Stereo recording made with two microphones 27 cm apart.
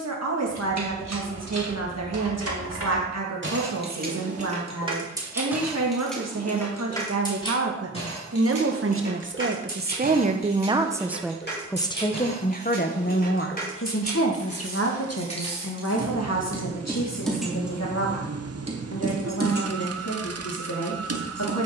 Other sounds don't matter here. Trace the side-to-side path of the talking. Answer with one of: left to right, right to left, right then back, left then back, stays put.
right to left.